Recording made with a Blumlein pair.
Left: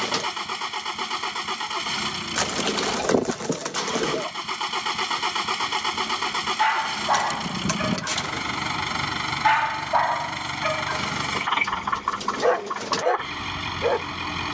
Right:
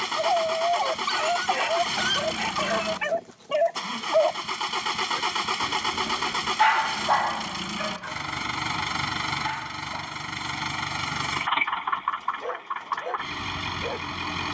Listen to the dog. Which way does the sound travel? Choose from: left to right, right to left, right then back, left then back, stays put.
right to left.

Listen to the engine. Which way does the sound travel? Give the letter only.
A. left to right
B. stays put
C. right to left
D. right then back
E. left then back
B.